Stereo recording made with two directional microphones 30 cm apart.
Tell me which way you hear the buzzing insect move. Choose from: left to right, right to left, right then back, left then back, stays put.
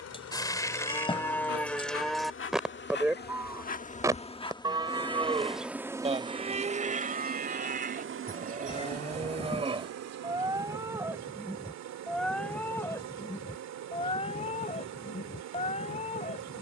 left to right.